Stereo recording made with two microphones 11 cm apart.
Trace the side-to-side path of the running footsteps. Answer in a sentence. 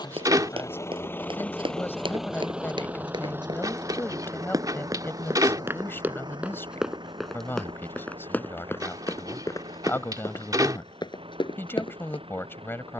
You can hear the running footsteps move from right to left.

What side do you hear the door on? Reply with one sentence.
In this clip you hear the door on the right.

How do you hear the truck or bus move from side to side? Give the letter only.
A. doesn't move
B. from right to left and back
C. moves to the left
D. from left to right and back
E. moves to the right
E.